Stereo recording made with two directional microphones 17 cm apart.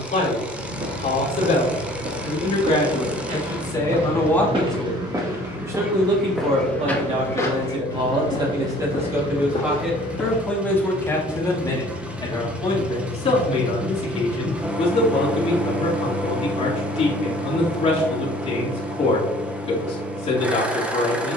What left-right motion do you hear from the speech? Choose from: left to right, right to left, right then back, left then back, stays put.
right then back.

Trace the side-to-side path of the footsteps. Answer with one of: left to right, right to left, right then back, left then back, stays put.
right to left.